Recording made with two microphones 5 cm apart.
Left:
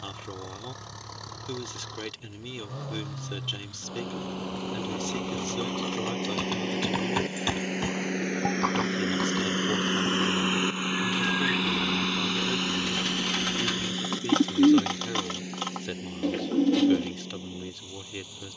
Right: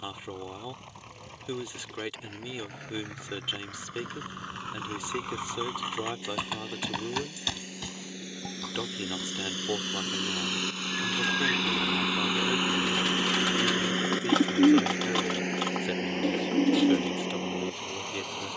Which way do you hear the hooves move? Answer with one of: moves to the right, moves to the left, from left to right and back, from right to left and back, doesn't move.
moves to the left.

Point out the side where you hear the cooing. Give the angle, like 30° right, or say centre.
centre.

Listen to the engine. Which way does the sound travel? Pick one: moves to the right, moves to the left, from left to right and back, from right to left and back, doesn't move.
moves to the right.